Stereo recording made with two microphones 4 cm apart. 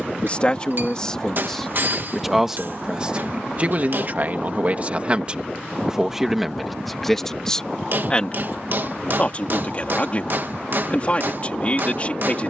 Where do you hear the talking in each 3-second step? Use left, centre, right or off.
centre, right, centre, left.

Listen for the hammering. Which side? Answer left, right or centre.
right.